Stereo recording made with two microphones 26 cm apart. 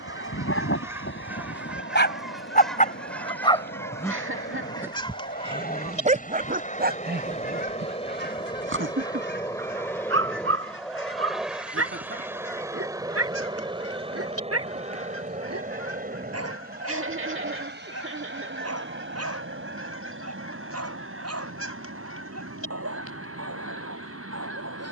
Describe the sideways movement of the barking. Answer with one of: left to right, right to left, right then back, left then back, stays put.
left to right.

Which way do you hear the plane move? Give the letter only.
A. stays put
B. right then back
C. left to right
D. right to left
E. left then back
C.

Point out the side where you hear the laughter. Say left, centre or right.
right.